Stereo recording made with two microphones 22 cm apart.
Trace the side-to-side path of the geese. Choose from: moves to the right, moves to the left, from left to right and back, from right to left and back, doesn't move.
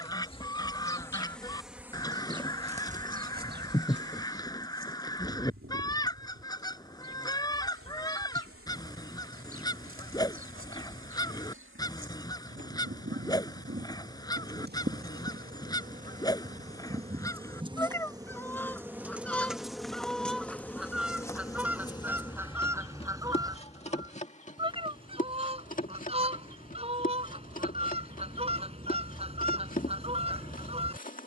moves to the right.